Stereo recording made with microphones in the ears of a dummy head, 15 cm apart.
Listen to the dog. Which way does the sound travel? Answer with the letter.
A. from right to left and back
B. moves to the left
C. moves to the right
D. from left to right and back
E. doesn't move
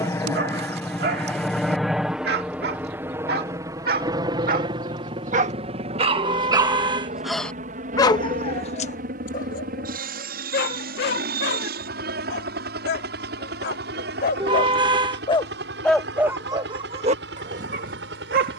A.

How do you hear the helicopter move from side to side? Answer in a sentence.
In this clip you hear the helicopter travel towards the right.